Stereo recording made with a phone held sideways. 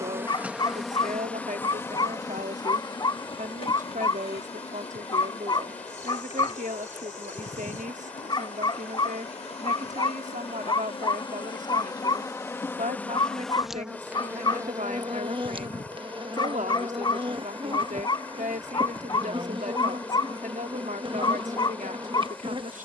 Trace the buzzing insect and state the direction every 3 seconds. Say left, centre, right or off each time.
centre, left, left, left, centre, right, right, right.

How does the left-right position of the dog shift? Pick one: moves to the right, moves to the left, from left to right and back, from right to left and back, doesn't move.
doesn't move.